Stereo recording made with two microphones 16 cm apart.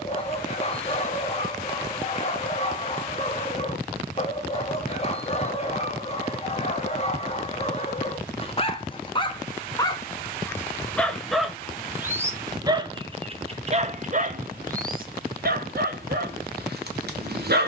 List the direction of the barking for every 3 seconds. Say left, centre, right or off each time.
left, left, left, centre, right, right.